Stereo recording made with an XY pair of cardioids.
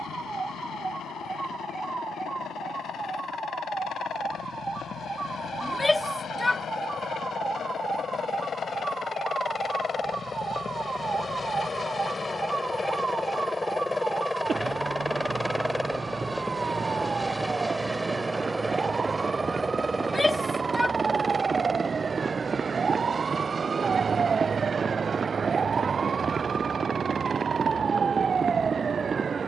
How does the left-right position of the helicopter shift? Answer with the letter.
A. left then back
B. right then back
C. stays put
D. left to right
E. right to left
D.